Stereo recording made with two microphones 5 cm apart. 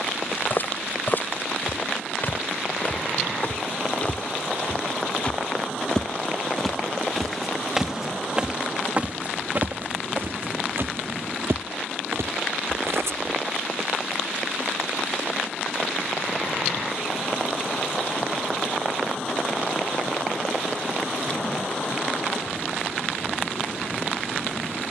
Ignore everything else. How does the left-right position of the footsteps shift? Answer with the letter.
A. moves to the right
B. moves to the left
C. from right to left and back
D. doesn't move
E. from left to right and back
A.